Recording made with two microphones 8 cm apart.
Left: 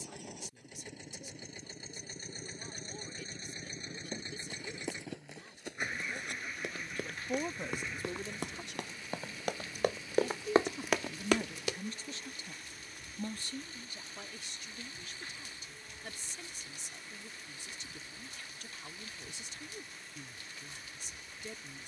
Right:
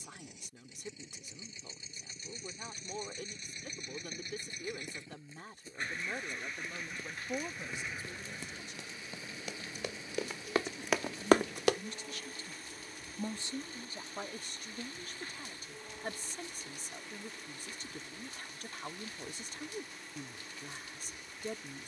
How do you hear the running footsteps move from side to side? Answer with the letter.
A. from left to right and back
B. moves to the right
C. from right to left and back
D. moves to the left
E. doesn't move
B.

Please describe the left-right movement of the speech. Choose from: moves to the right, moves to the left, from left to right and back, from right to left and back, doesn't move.
from right to left and back.